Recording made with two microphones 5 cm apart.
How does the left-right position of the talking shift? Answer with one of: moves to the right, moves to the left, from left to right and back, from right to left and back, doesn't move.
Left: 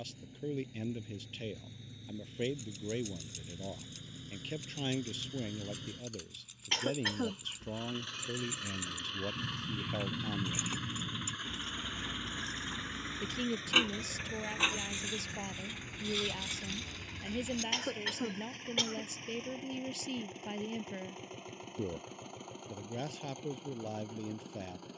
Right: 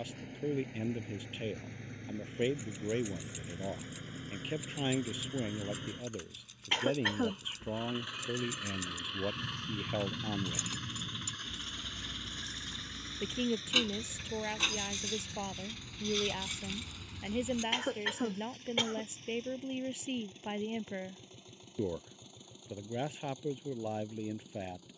doesn't move.